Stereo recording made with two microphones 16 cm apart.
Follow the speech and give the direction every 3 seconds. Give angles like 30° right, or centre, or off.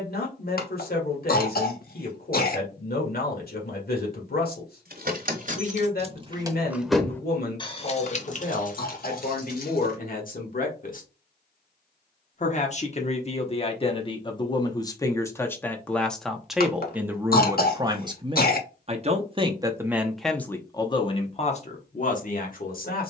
60° left, 60° left, 60° left, 60° left, 30° left, centre, 10° right, 50° left.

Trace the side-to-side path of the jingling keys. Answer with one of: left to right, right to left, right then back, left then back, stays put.
right to left.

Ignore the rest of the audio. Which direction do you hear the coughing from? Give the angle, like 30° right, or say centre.
60° left.